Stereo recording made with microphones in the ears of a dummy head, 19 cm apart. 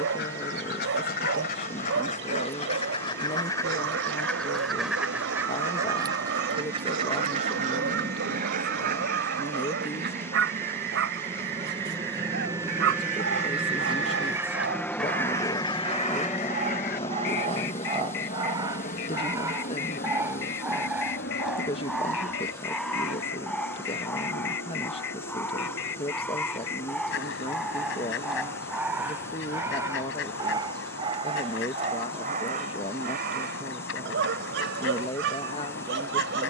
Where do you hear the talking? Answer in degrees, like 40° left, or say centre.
30° left.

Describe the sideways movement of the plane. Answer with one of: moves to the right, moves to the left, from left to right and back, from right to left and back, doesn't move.
moves to the left.